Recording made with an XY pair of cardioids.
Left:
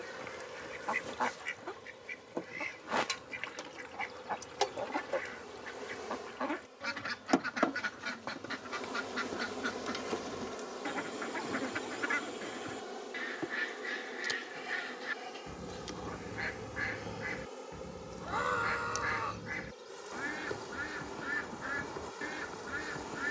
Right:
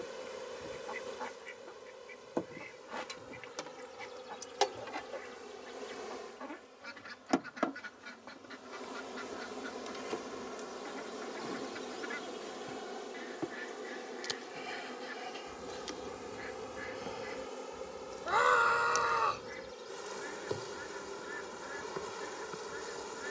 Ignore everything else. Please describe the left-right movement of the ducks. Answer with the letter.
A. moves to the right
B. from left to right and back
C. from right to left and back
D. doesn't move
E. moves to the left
D.